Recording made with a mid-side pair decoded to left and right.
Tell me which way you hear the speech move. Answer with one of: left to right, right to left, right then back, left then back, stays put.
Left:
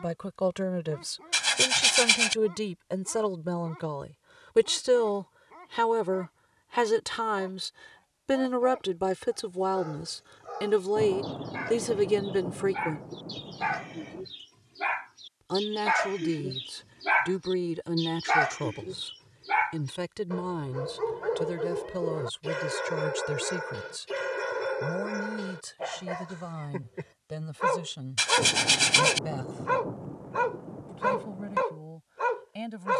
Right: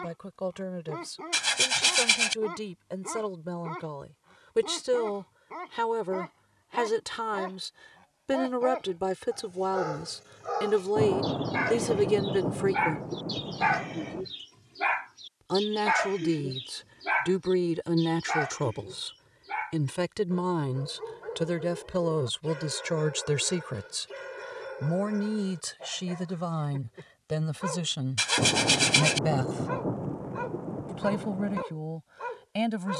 left to right.